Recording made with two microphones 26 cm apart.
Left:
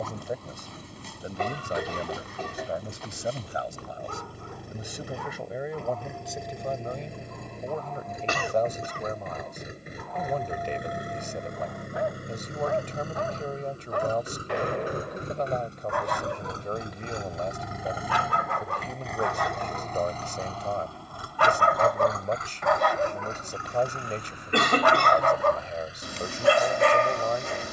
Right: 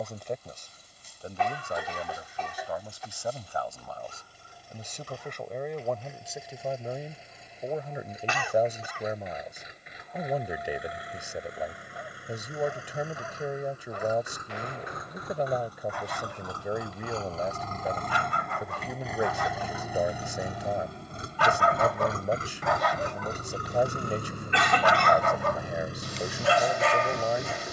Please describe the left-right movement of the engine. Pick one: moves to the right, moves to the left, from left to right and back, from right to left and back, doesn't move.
moves to the right.